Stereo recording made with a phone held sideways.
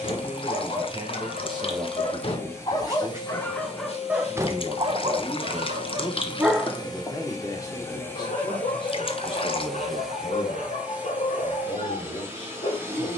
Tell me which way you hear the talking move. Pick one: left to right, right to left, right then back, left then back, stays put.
right to left.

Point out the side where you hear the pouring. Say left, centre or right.
left.